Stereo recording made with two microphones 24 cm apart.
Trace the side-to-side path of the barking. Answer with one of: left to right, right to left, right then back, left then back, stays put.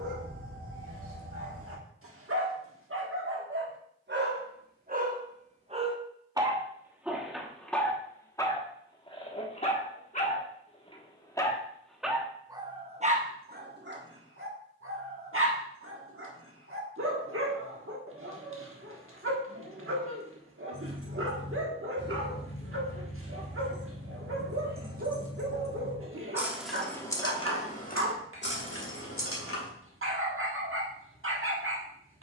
left then back.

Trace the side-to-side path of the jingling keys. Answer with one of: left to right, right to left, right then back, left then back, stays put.
right to left.